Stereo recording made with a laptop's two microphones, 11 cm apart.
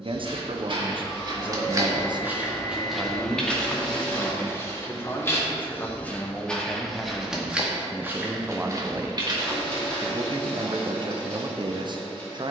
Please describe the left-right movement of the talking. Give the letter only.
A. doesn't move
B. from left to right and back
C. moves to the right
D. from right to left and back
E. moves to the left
D.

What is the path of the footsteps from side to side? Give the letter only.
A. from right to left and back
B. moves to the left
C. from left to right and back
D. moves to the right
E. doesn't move
A.